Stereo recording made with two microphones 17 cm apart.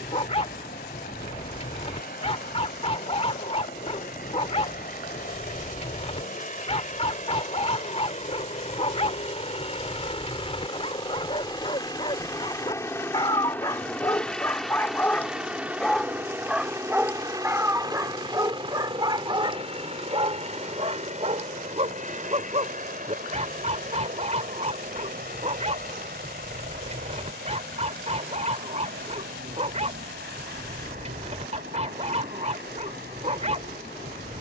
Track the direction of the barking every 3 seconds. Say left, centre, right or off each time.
left, left, left, left, left, centre, right, right, right, right, right, right.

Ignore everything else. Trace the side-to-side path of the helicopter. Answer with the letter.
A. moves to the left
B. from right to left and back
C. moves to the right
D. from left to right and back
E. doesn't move
C.